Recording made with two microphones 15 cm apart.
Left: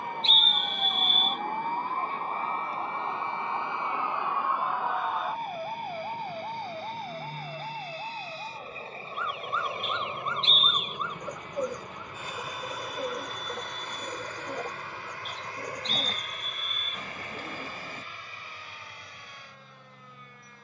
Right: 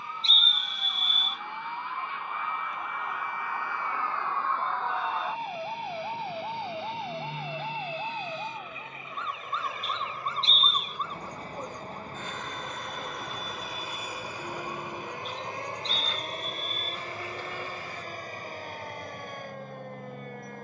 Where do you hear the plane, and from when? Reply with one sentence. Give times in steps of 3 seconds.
In this clip you hear the plane on the left from 0 s, in the centre from 12 s and on the right from 15 s.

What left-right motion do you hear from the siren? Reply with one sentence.
You can hear the siren move from left to right.